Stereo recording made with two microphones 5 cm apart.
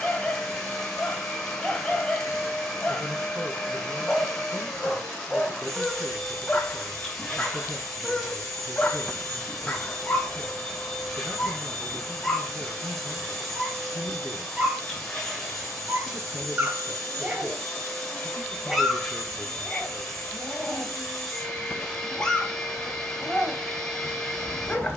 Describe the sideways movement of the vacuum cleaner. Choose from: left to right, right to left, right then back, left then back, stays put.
stays put.